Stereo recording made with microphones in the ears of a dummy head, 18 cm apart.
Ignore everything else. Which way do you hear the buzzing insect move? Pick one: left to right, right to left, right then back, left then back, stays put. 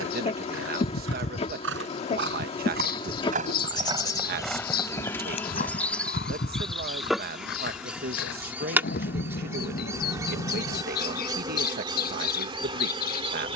left to right.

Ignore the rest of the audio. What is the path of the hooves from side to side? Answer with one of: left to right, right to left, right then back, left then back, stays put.
right to left.